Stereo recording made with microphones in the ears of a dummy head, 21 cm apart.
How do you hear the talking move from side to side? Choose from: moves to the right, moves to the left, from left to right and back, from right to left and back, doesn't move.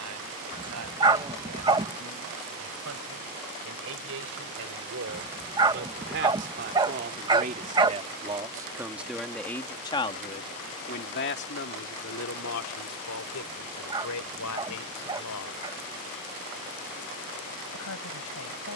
moves to the left.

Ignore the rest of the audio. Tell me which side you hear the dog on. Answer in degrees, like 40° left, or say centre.
20° right.